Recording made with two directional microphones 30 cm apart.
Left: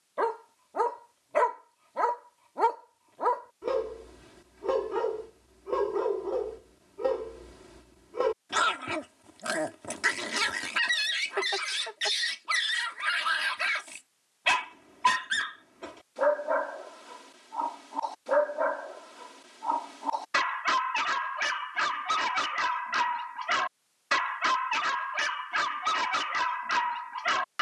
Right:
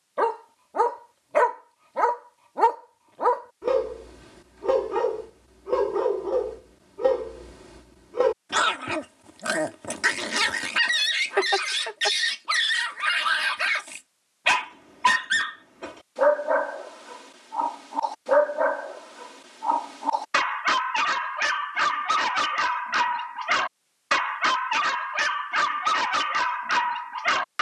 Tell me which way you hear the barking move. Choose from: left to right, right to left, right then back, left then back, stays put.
stays put.